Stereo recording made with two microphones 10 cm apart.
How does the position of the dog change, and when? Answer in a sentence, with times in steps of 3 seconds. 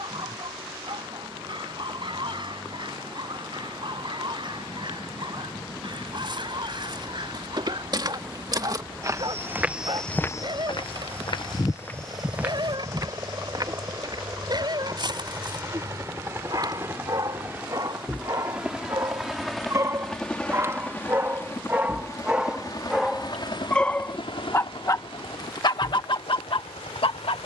You can hear the dog on the right from 0 s, in the centre from 21 s and on the left from 24 s.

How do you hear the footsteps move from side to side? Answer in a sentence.
You can hear the footsteps go left and come back.